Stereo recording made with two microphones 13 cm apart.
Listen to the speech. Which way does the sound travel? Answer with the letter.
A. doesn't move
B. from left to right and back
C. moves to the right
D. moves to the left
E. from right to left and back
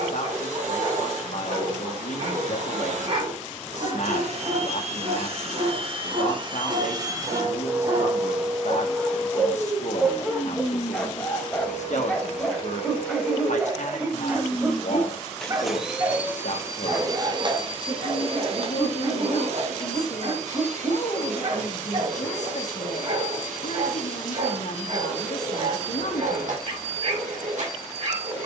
A.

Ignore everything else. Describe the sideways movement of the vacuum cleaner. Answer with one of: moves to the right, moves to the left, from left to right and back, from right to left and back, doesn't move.
from right to left and back.